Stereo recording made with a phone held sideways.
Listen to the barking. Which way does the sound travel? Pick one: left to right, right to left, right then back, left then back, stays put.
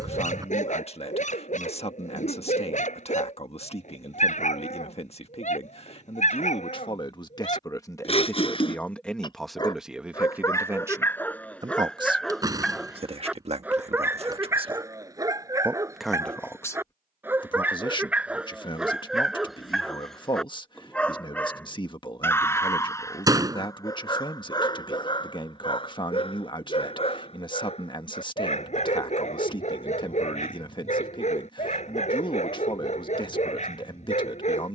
right then back.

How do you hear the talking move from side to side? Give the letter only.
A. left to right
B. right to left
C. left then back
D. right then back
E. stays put
D.